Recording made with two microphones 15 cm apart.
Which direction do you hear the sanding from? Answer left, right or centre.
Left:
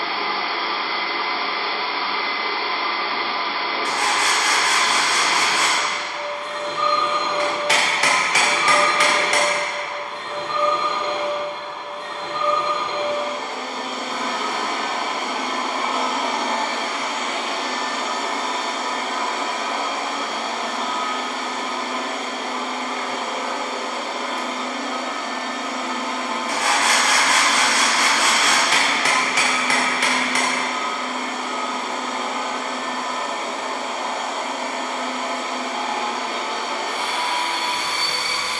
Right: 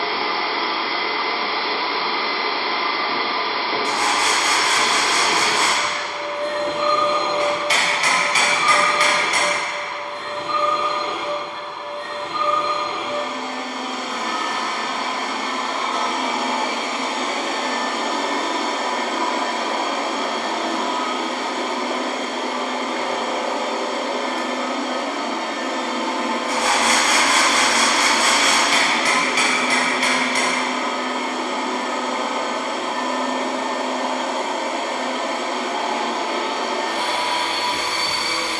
left.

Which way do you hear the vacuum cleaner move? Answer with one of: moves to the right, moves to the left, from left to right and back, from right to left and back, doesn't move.
from right to left and back.